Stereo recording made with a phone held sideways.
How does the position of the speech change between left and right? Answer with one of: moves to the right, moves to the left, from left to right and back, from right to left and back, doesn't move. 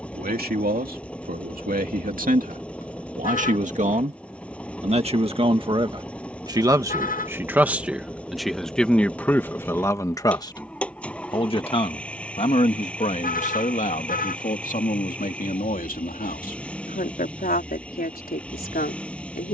moves to the left.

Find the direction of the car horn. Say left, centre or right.
left.